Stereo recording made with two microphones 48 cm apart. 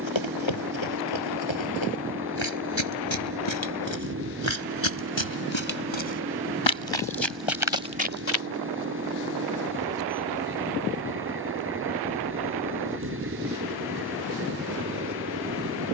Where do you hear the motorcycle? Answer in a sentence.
You can hear the motorcycle on the right.